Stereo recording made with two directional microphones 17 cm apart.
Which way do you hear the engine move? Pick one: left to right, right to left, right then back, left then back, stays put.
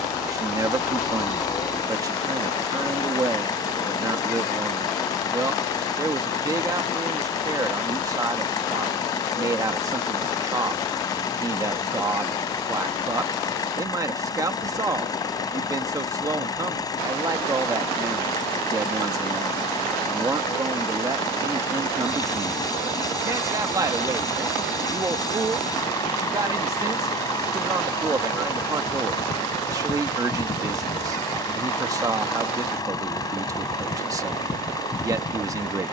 stays put.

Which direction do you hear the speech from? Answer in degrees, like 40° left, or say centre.
20° right.